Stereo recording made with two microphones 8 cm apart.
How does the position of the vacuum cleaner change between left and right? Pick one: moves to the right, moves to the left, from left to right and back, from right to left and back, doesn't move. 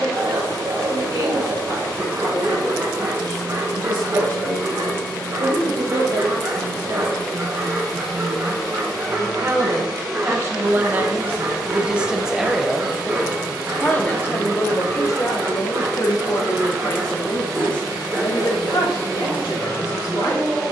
moves to the right.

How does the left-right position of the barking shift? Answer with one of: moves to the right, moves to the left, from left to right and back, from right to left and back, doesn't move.
doesn't move.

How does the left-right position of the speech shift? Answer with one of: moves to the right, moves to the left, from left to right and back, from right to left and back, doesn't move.
moves to the left.